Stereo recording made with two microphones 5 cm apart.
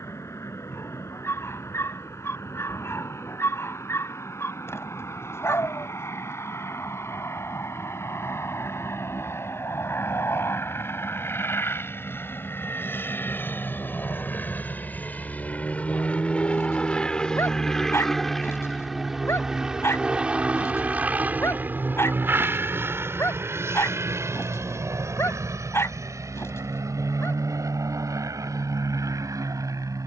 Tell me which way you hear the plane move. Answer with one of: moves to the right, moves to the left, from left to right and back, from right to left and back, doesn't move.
moves to the right.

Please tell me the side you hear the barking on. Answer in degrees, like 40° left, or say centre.
50° left.